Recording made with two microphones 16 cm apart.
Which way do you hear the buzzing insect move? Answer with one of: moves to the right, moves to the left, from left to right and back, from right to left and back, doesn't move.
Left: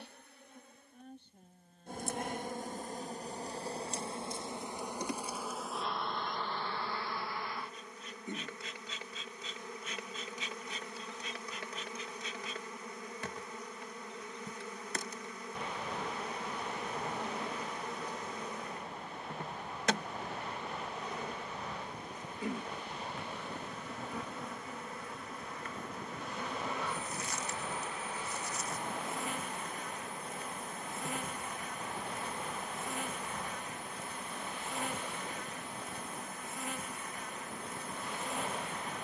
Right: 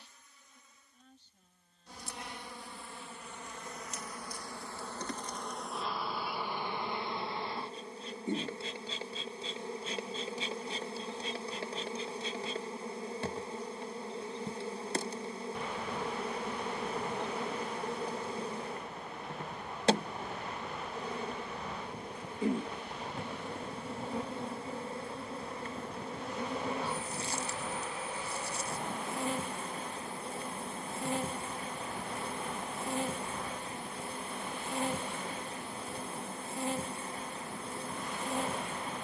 moves to the right.